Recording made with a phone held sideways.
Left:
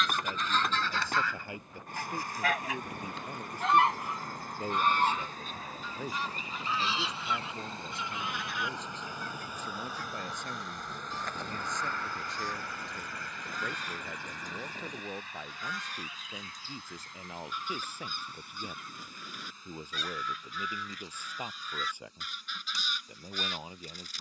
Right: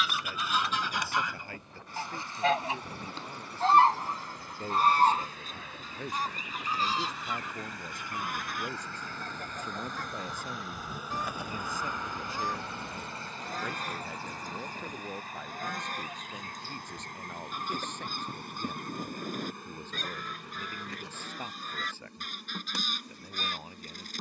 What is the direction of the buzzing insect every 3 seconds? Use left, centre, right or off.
left, left, left, centre, right, right, right, right.